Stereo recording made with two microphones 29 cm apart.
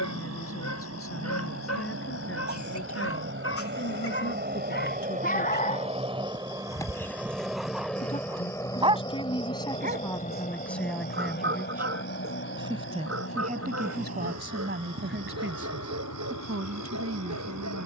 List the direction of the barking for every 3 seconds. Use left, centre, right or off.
left, left, centre, right, right, right.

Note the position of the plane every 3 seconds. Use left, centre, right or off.
right, right, centre, left, left, left.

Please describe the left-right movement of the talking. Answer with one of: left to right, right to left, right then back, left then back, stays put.
left to right.